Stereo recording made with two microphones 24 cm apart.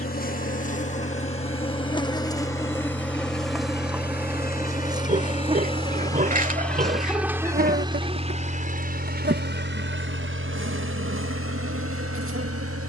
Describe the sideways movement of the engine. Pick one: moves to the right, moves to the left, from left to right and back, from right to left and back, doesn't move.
moves to the right.